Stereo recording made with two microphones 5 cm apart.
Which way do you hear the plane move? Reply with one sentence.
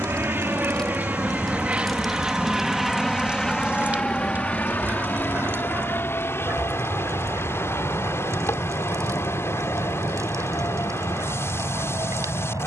You can hear the plane go from the right side to the left.